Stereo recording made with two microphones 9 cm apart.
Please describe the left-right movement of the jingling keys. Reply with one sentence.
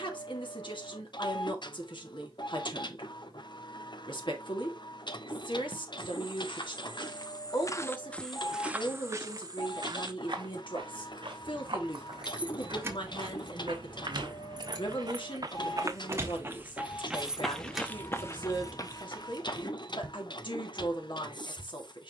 In this clip you hear the jingling keys go right and come back.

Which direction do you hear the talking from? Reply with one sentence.
In this clip you hear the talking on the left.